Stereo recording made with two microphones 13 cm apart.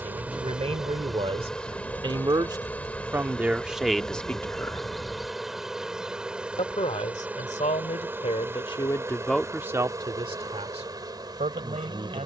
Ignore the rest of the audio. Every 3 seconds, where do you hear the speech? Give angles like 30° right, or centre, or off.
50° right, centre, 50° left, 30° right.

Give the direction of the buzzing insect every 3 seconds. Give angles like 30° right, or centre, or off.
centre, centre, 10° right, 30° right.